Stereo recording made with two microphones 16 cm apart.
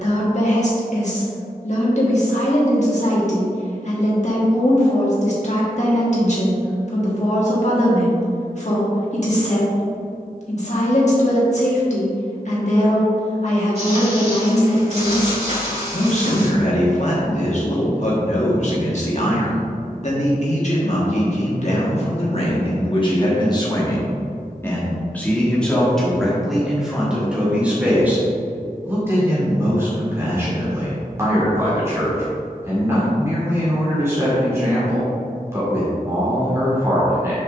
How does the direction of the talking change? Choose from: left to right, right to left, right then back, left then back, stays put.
left to right.